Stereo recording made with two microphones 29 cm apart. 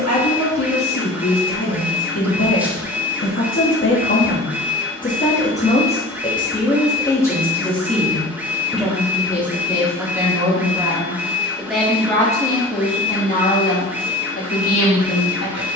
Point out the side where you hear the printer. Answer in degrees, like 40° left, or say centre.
10° right.